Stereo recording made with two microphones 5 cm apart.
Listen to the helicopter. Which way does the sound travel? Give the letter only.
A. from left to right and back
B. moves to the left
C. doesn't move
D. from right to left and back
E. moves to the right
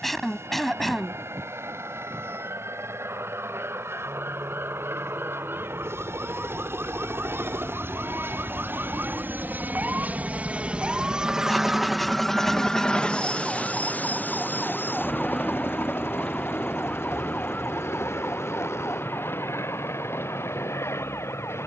B.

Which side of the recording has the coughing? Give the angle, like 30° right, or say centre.
centre.